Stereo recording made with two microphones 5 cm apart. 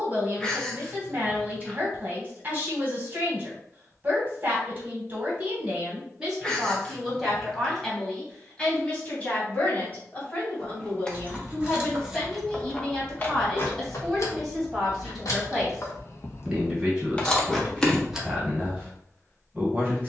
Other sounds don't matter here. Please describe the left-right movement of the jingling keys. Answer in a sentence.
In this clip you hear the jingling keys move from right to left and back again.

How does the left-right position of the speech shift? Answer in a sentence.
You can hear the speech move from right to left and back again.